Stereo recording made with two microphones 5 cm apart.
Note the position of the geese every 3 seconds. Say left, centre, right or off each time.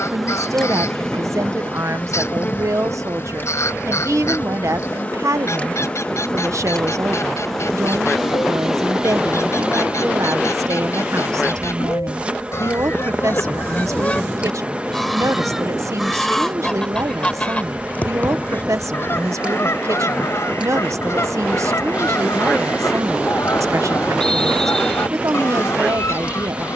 left, left, left, left, left, centre, left, left, left.